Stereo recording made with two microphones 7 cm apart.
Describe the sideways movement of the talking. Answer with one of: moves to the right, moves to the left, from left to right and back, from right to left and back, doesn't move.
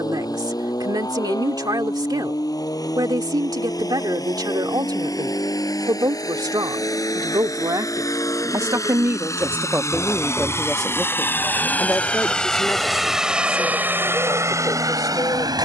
moves to the left.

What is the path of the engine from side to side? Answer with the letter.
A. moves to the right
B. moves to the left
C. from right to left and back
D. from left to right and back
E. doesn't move
A.